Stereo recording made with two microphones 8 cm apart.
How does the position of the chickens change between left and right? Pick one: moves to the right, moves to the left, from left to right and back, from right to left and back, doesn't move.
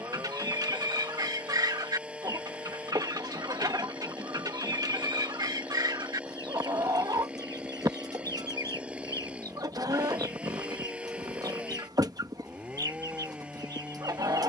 doesn't move.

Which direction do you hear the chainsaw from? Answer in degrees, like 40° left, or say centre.
10° right.